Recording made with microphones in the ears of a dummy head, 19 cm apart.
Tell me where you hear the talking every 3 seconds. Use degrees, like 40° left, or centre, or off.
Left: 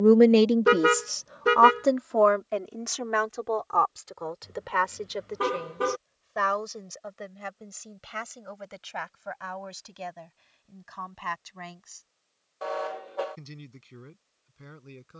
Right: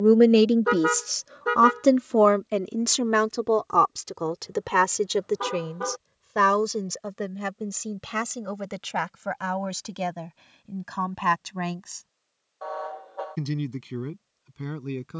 30° right, 60° right, 70° right, 70° right, 80° right.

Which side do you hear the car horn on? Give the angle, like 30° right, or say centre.
30° left.